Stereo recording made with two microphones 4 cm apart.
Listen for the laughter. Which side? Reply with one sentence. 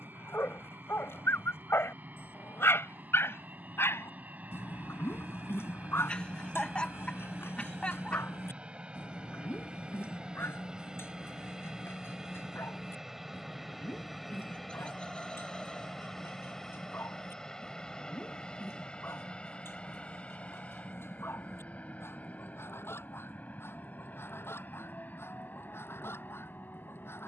You can hear the laughter on the left.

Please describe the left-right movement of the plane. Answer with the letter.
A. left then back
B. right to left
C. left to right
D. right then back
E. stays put
B.